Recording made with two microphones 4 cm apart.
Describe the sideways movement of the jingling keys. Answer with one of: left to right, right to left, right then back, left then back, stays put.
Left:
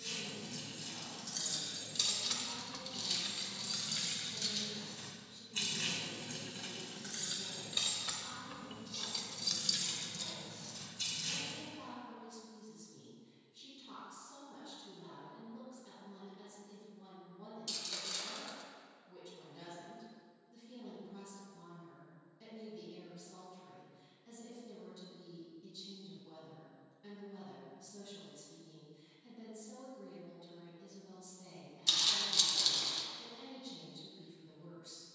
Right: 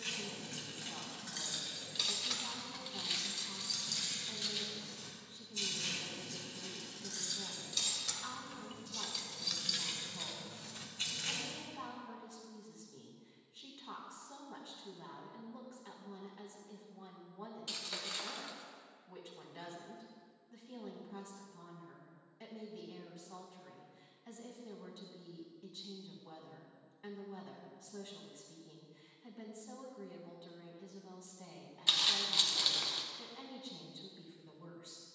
left then back.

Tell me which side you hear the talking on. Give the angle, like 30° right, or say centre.
60° right.